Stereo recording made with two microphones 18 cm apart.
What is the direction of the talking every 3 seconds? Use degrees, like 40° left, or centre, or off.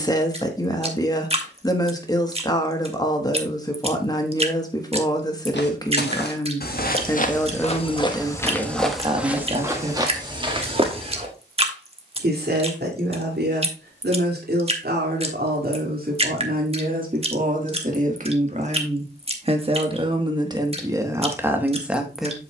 20° left, 20° left, centre, 30° right, 60° right, 50° right, 30° right, 10° right.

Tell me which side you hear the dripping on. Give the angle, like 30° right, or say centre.
30° right.